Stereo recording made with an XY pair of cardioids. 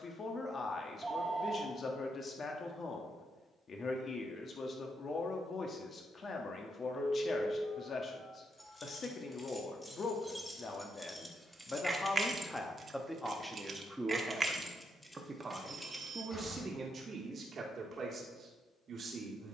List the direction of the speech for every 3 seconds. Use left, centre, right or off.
left, left, left, left, centre, right, right.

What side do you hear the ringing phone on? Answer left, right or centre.
right.